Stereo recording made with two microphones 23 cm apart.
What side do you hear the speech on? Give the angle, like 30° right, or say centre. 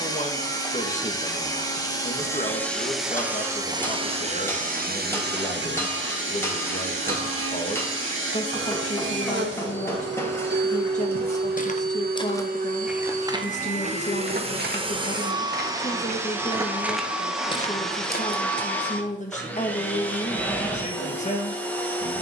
30° left.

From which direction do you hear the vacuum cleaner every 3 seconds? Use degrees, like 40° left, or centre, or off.
10° left, 30° right, 60° right, 50° right, 30° right, 10° right, 10° left, 10° left.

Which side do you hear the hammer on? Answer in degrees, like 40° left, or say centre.
10° left.